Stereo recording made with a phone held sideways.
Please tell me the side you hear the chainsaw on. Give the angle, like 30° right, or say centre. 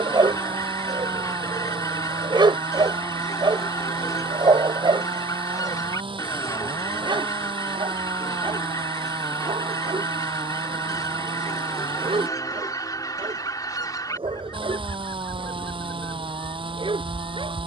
40° right.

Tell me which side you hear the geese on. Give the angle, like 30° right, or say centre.
30° left.